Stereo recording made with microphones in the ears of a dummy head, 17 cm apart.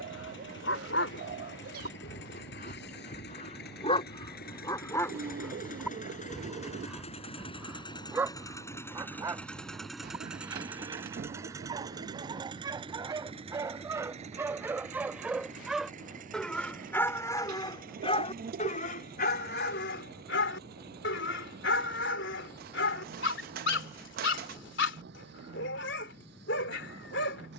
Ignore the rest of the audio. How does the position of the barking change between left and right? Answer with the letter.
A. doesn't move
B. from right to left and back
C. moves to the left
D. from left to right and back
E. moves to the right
D.